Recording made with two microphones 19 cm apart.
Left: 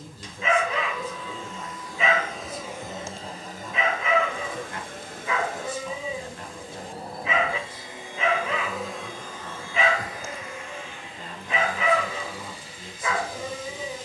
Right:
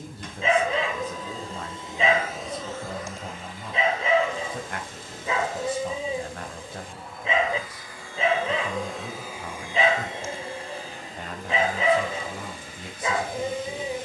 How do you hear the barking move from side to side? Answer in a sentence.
You can hear the barking stay put.